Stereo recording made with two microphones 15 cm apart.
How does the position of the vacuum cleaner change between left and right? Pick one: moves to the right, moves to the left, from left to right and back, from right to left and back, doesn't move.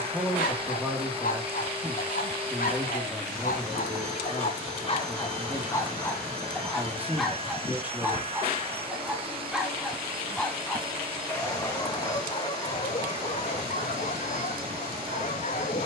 doesn't move.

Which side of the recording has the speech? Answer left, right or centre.
centre.